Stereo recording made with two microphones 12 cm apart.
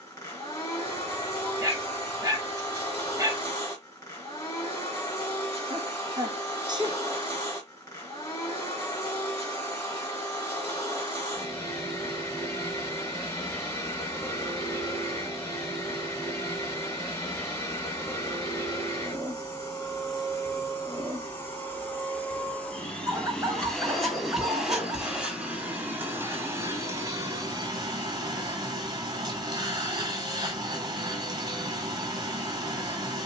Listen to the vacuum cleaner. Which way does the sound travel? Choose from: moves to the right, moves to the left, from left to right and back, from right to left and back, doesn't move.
moves to the right.